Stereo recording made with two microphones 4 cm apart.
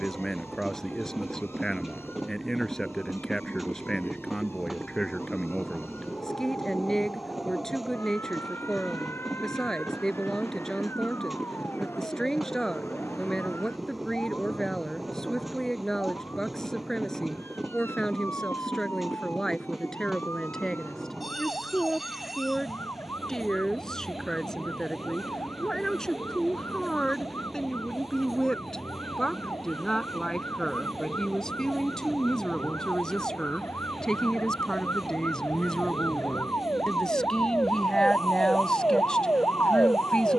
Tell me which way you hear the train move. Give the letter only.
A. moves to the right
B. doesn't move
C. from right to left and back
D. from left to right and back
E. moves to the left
B.